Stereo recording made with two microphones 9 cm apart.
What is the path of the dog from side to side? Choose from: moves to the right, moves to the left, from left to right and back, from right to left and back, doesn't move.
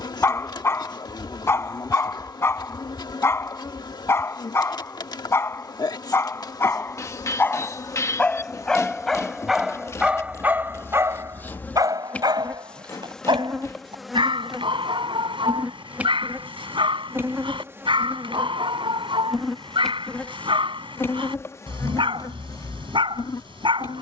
moves to the right.